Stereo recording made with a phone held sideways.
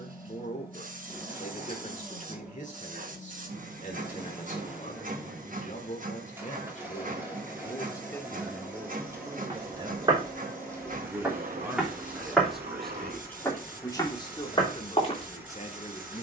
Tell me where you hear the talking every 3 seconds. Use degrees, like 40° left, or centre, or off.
50° left, 50° left, 30° left, 20° right, 10° left, 40° left.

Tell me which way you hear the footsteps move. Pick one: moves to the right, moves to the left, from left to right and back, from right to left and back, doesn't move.
moves to the left.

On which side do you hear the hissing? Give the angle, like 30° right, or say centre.
50° right.